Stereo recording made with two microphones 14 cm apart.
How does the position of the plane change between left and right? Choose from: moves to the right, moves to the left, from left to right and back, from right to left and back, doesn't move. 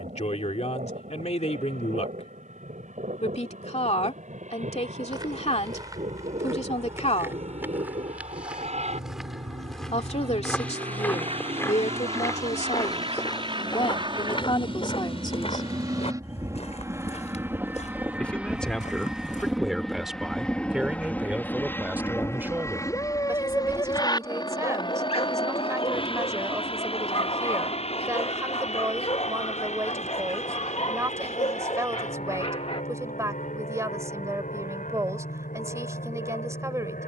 moves to the left.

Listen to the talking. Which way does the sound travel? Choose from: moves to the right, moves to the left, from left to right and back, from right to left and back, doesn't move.
moves to the right.